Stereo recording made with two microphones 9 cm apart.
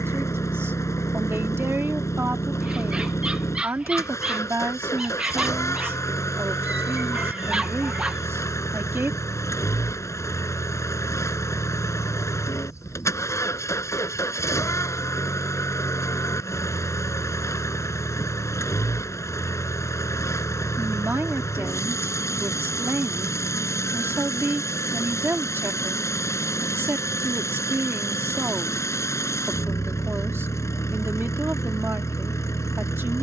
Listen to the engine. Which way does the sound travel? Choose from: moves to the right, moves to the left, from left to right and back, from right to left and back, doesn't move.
doesn't move.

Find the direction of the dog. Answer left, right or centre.
centre.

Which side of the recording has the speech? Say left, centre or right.
right.